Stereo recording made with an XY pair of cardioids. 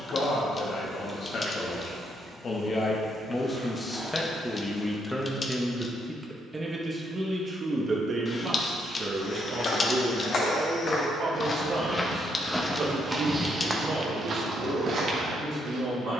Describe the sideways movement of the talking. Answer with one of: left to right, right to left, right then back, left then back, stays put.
left to right.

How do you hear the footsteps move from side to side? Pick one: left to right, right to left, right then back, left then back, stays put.
left to right.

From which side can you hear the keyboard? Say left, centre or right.
left.